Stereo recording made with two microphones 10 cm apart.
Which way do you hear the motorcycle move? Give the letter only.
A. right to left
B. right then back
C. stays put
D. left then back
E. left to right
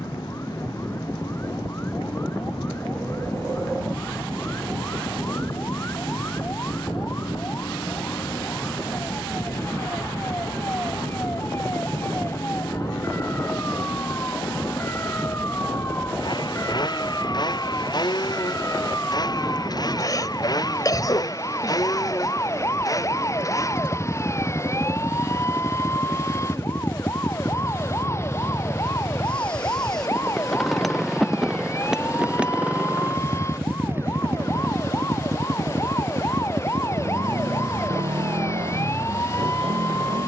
E.